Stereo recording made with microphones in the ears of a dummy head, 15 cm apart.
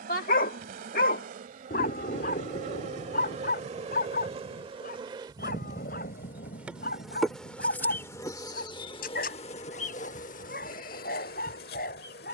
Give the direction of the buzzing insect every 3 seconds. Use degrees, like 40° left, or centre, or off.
50° right, 30° right, 10° left, 50° left.